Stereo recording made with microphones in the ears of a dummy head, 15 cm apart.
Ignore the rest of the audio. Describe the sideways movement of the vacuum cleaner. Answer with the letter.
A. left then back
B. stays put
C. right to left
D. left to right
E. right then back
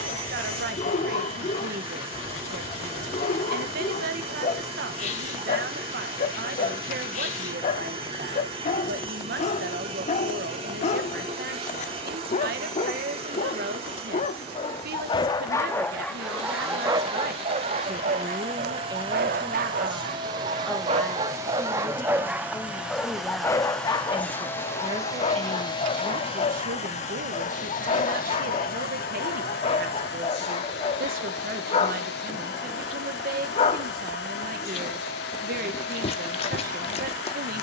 C.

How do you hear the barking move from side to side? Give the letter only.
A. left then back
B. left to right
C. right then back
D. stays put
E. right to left
C.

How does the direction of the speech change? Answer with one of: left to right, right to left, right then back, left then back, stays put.
left then back.